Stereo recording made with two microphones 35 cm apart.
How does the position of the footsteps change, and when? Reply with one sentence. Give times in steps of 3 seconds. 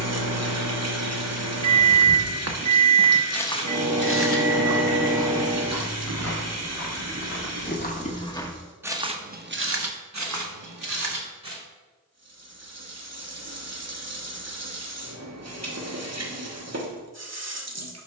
You can hear the footsteps on the right from 0 s, on the left from 3 s, on the right from 9 s and not at all from 12 s.